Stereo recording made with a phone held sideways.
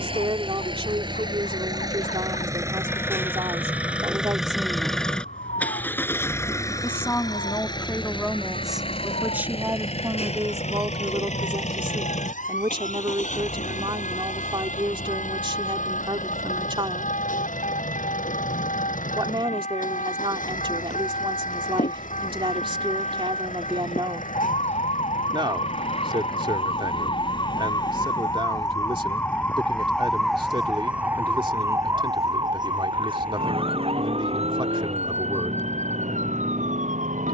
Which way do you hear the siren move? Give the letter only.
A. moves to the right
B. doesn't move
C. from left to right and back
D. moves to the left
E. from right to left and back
A.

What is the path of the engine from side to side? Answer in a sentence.
In this clip you hear the engine travel towards the left.